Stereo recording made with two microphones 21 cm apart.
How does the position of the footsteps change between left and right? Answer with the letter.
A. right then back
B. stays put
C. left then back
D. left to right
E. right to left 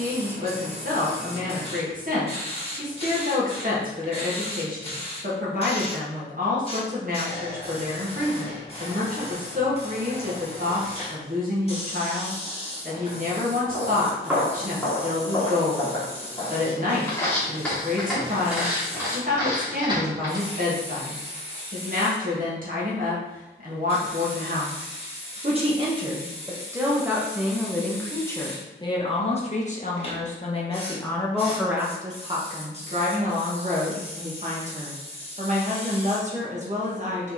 C.